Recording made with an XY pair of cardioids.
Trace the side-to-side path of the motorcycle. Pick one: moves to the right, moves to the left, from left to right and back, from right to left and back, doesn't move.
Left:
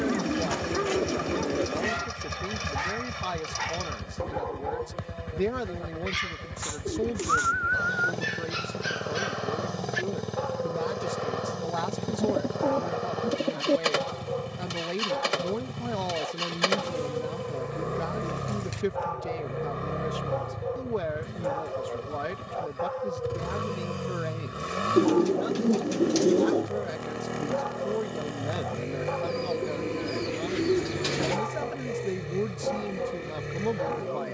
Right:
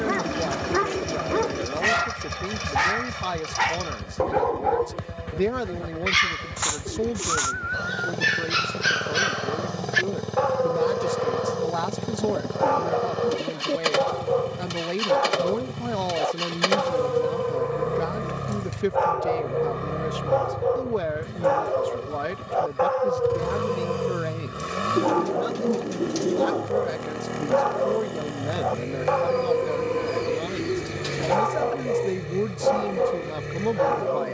doesn't move.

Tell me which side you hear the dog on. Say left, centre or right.
right.